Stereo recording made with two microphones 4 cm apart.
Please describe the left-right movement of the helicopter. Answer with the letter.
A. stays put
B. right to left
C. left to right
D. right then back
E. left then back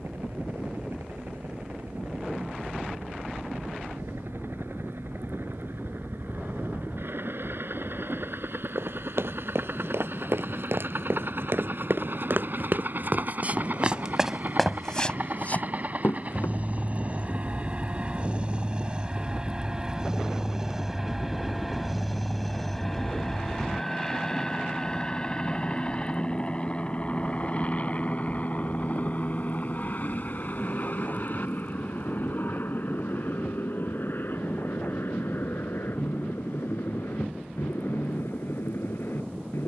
B.